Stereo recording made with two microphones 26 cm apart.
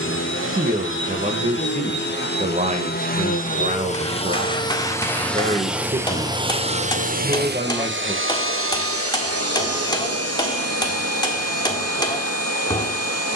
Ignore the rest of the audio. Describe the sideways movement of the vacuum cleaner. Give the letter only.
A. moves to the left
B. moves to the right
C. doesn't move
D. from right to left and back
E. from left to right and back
B.